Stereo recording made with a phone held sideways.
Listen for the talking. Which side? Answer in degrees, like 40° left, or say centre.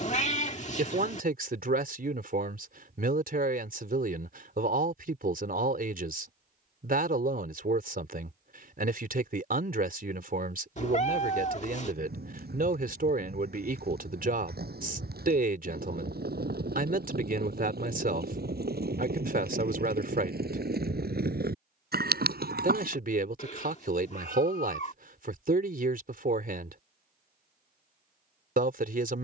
60° right.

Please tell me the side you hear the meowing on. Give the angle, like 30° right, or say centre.
50° left.